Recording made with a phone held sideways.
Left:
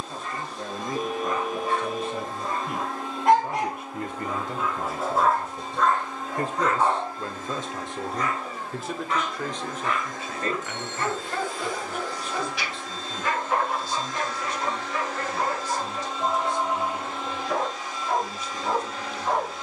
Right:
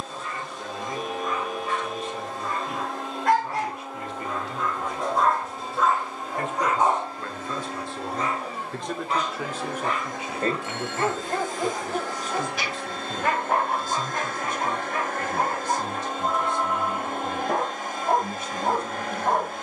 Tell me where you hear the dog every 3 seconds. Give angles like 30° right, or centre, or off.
40° left, 10° left, 20° right, 40° right, 60° right, 60° right, 60° right.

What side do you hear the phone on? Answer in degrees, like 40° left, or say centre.
50° left.